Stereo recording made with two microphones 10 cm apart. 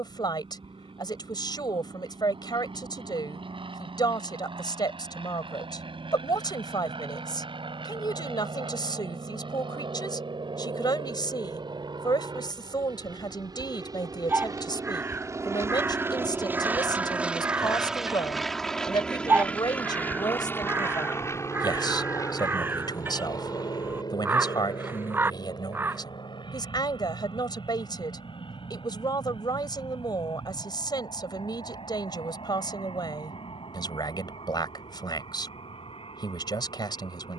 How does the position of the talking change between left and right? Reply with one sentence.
You can hear the talking stay put.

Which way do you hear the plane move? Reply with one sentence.
In this clip you hear the plane move from right to left.